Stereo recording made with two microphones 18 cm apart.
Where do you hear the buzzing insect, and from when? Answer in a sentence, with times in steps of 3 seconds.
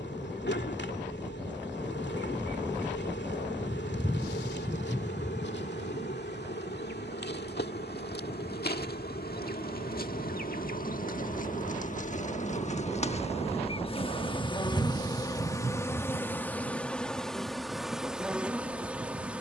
In this clip you hear the buzzing insect on the left from 0 s and in the centre from 15 s.